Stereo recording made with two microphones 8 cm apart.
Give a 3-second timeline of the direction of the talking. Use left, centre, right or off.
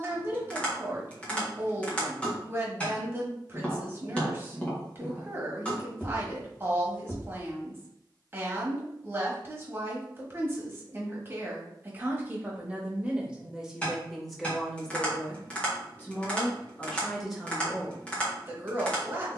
right, right, right, right, centre, centre, right.